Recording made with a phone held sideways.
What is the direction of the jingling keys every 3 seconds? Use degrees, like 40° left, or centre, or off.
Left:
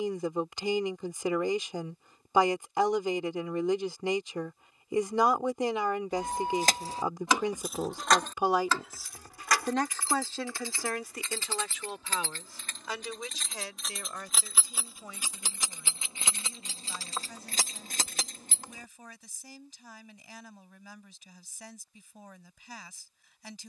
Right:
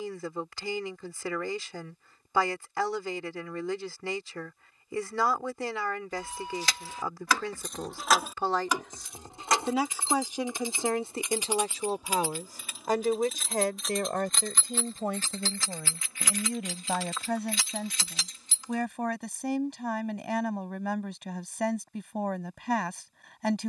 off, off, 20° left, 20° right, centre, 30° left, 50° left, off.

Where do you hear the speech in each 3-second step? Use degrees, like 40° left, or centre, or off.
20° left, 20° left, 20° left, 20° right, 50° right, 70° right, 70° right, 70° right.